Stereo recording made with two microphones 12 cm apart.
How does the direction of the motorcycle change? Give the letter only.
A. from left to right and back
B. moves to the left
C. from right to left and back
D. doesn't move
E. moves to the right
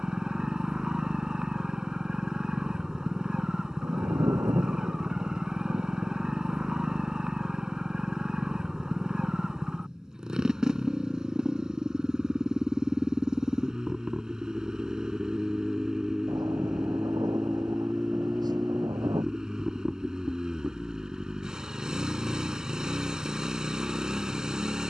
D.